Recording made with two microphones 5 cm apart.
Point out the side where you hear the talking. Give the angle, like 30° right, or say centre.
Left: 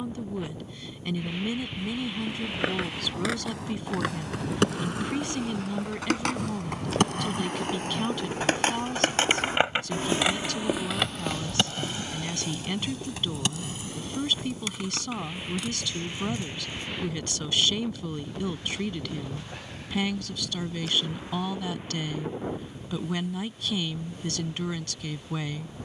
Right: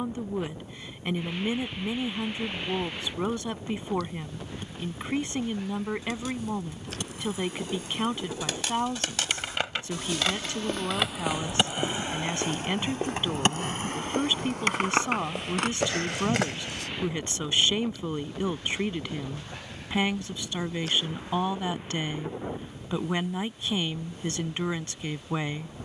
20° right.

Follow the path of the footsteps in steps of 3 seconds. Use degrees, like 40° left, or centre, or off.
80° left, 80° left, 60° left, 10° left, 60° right, 70° right, off, off, off.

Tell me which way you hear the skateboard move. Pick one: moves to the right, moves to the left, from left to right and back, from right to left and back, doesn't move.
moves to the right.